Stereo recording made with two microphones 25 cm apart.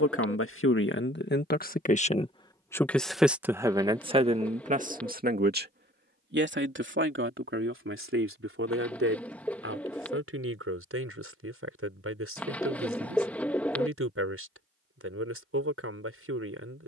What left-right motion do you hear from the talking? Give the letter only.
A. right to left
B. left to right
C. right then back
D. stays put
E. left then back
B.